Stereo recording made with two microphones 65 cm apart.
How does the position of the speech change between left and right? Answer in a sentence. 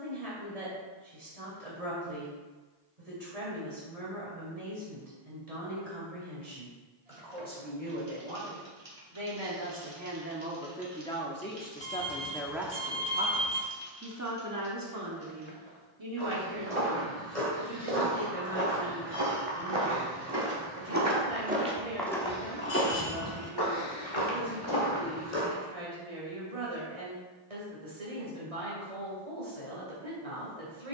In this clip you hear the speech move from right to left and back again.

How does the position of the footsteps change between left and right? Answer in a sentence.
In this clip you hear the footsteps move to the left.